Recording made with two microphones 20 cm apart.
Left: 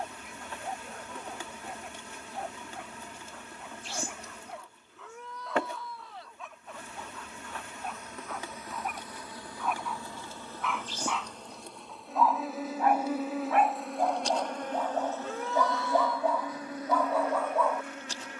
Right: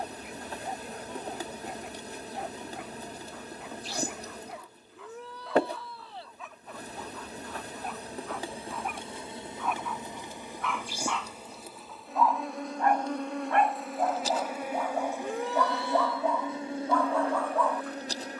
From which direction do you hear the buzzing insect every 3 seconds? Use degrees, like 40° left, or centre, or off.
40° right, 40° right, 30° right, 10° right, centre, 20° right.